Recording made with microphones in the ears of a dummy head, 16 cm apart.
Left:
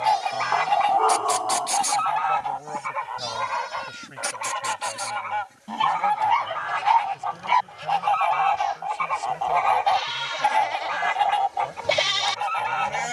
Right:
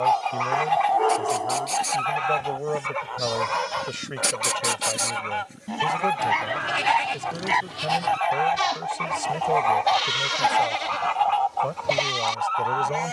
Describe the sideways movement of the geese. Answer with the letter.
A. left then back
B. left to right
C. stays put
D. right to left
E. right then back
E.